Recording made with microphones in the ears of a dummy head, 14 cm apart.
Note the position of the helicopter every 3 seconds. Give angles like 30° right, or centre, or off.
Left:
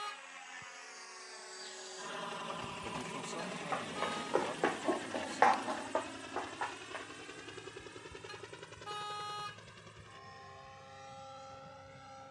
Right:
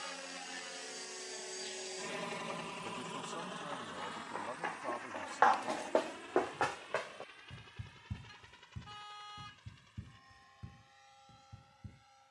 30° right, 30° left, 50° left, 60° left.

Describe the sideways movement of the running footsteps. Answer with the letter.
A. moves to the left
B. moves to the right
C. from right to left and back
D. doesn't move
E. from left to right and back
B.